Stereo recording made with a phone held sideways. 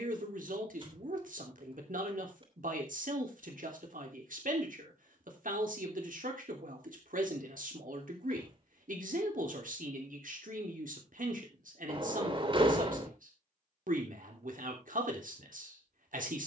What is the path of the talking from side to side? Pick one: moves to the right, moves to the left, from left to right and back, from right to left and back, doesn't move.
doesn't move.